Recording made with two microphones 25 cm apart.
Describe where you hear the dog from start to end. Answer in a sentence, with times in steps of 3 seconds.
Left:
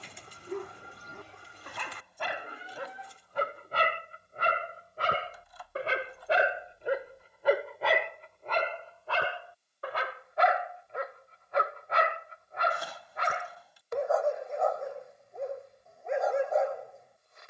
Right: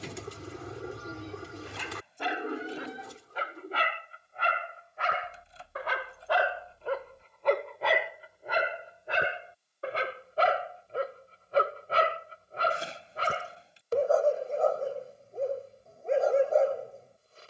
In this clip you hear the dog on the left from 0 s, in the centre from 6 s and on the right from 9 s.